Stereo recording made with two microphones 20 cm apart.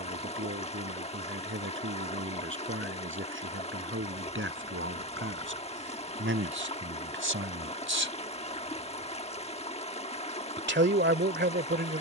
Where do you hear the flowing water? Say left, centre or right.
left.